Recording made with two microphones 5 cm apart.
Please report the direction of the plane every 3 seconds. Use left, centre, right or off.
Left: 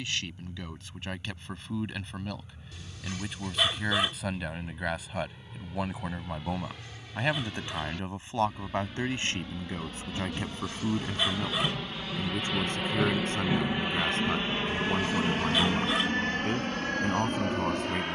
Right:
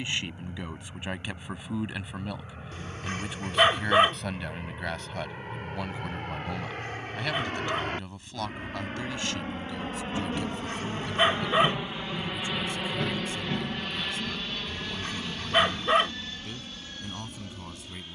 right, right, right, right, centre, left.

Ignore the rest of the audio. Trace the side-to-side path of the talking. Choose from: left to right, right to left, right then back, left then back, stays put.
right to left.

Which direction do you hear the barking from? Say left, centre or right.
right.